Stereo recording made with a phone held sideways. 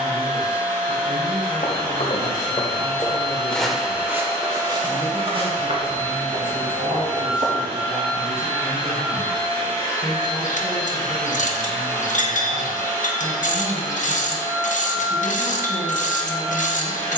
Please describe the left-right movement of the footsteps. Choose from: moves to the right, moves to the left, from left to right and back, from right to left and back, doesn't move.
moves to the right.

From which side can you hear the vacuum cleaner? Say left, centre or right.
right.